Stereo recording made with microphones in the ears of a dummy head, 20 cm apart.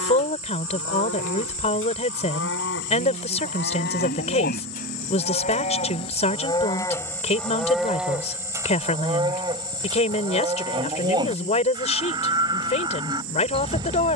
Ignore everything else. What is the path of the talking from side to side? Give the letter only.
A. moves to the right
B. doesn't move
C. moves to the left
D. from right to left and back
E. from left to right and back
B.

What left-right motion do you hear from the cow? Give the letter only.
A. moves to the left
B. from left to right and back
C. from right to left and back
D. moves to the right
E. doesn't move
D.